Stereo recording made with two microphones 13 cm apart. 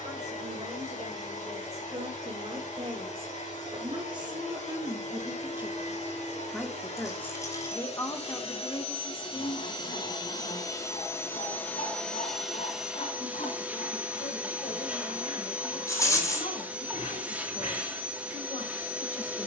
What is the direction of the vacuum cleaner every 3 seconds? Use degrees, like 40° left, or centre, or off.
70° left, 70° left, 50° left, 30° left, 10° right, 10° right, 10° right.